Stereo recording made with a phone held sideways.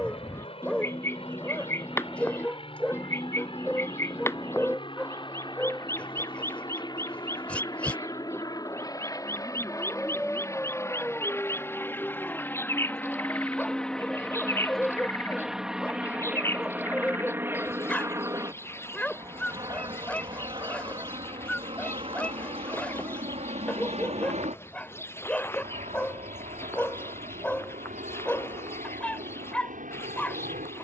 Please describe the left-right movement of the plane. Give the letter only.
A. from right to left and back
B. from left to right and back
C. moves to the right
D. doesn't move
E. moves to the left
C.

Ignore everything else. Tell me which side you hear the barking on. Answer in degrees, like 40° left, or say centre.
10° left.